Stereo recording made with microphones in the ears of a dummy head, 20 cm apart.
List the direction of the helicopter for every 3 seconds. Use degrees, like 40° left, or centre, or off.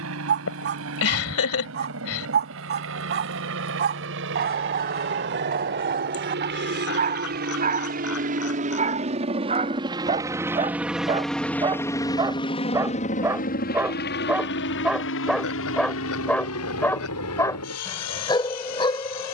60° right, 60° right, 40° right, 10° right, 30° left, 60° left, 70° left.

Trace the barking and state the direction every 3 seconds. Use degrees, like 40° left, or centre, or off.
50° right, 50° right, 40° right, 30° right, 10° right, 10° left, 20° left.